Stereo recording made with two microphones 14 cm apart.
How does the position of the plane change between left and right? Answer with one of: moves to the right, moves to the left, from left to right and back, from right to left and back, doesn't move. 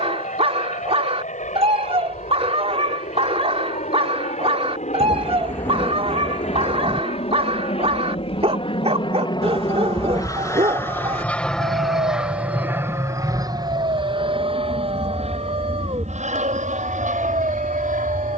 moves to the right.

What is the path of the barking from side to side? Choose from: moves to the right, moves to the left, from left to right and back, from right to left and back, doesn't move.
doesn't move.